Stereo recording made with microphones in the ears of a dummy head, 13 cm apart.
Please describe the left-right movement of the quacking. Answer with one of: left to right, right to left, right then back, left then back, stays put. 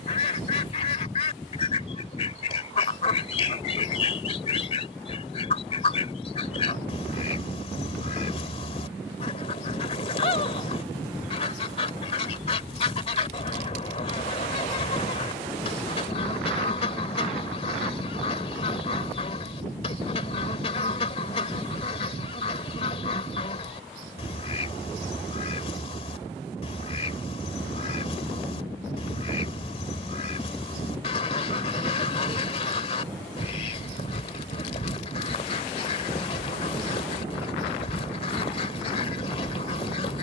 stays put.